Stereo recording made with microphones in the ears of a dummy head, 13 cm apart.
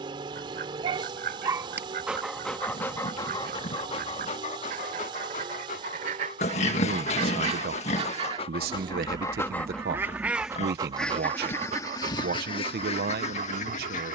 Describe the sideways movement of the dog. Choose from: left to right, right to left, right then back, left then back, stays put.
left then back.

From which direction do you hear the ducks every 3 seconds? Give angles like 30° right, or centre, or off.
60° right, 60° right, 40° right, centre, 40° left.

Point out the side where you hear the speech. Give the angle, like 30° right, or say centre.
70° right.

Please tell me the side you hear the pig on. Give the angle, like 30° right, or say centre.
50° left.